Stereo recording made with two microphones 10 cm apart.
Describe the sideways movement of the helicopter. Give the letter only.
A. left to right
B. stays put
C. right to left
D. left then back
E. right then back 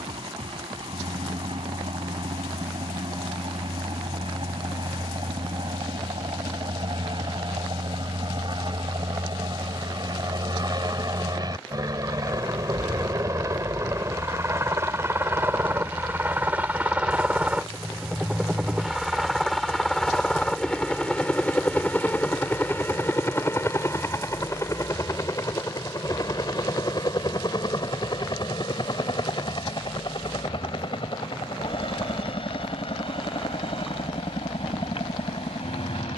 C.